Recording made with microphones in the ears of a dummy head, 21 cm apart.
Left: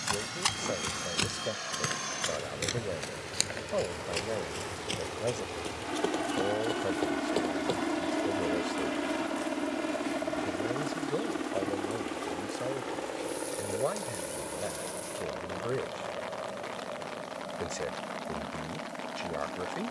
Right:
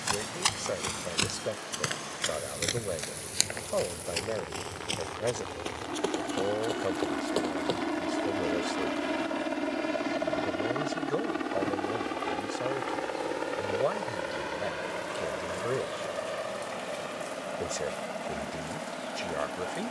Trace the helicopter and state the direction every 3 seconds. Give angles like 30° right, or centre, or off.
50° left, 30° left, 10° left, 30° right, 50° right, 60° right, 70° right.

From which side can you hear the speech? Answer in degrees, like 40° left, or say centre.
10° right.